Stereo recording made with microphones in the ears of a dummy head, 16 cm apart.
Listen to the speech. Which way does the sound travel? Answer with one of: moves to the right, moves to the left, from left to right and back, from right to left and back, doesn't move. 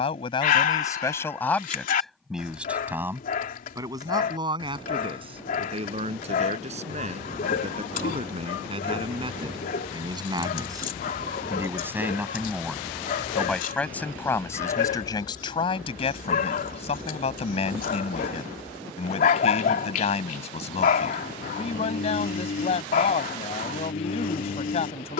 from left to right and back.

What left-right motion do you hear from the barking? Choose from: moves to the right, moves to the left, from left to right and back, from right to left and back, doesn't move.
doesn't move.